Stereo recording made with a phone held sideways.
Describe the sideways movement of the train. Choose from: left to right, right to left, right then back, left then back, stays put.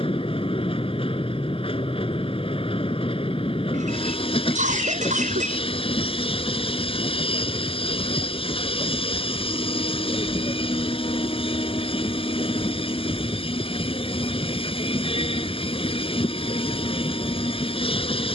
stays put.